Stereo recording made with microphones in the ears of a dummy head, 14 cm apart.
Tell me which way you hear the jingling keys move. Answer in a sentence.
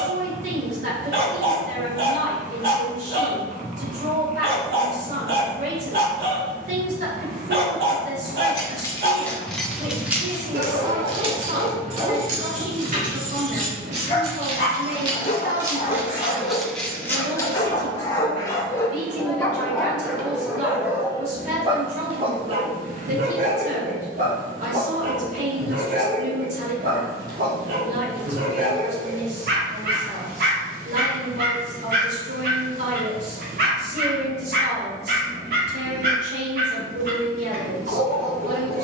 In this clip you hear the jingling keys move from left to right and back again.